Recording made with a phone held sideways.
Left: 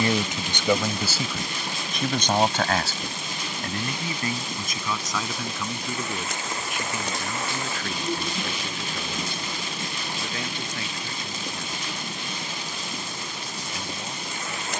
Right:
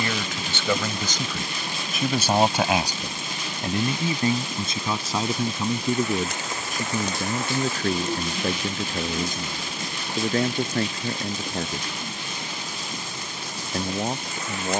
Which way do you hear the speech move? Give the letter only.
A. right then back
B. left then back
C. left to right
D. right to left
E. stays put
C.